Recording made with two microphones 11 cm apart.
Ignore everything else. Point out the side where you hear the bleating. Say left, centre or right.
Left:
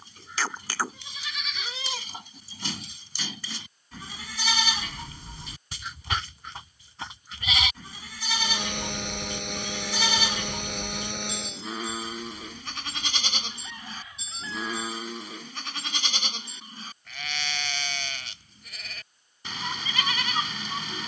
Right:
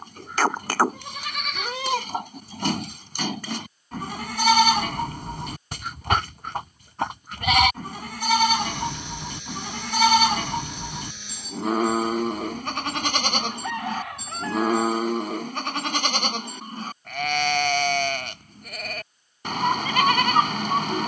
right.